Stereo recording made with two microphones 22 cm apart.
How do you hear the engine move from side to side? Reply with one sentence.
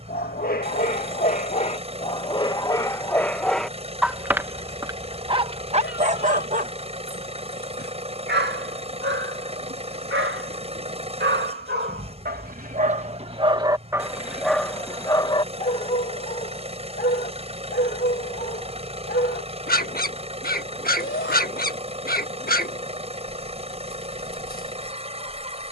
You can hear the engine stay put.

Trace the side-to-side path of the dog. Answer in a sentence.
You can hear the dog move from left to right and back again.